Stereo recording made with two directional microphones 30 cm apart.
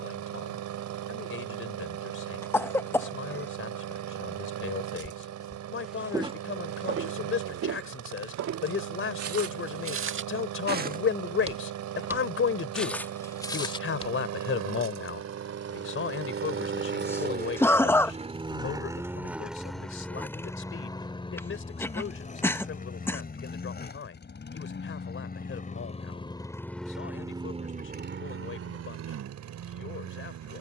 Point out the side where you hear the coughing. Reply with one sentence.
You can hear the coughing in the centre.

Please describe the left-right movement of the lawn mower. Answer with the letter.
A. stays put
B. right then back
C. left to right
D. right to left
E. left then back
E.